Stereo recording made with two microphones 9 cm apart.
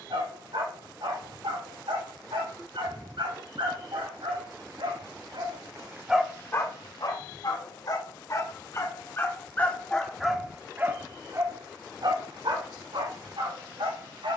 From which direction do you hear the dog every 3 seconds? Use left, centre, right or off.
right, right, left, centre, right.